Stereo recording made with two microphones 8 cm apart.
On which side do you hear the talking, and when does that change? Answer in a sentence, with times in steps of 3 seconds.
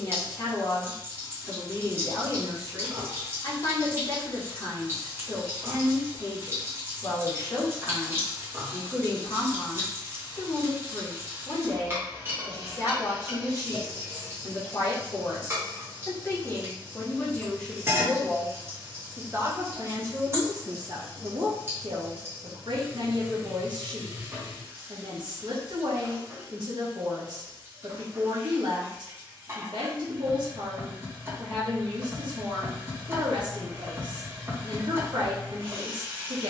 In this clip you hear the talking on the left from 0 s and on the right from 18 s.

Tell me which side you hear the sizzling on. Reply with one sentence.
You can hear the sizzling on the right.